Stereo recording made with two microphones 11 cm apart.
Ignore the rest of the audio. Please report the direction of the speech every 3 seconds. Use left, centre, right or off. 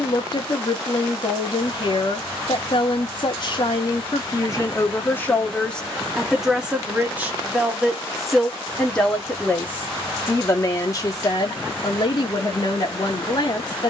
left, left, centre, left, left.